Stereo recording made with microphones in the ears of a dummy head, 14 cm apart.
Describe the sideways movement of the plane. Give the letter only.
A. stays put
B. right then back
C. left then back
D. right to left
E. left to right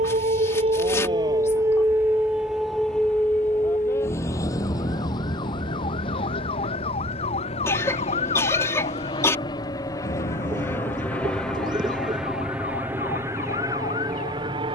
E.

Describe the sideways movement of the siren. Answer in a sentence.
In this clip you hear the siren move to the left.